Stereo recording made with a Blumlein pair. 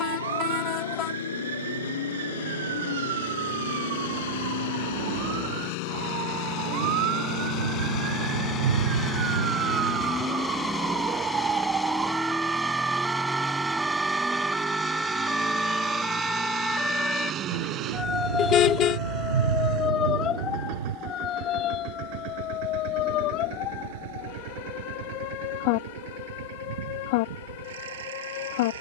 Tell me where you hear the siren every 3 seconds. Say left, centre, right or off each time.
right, right, right, right, centre, centre, left, left, left, left.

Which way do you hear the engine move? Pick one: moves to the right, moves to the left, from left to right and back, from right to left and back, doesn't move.
moves to the right.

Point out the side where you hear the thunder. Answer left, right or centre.
right.